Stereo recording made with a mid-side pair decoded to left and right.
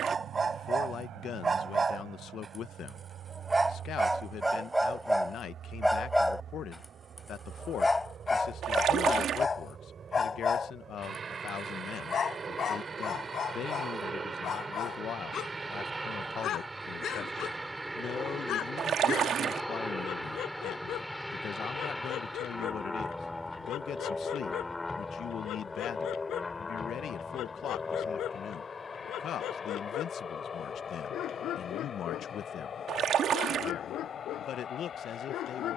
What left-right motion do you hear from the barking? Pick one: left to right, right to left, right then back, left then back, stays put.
right to left.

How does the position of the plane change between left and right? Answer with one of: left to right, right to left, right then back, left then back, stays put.
right to left.